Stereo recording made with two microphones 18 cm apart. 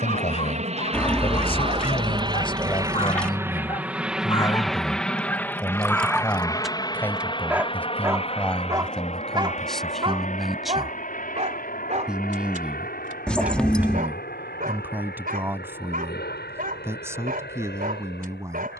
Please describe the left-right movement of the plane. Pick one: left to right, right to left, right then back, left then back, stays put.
right to left.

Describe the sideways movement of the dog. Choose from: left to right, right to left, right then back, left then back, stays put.
left to right.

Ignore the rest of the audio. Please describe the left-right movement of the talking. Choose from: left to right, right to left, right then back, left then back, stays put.
left to right.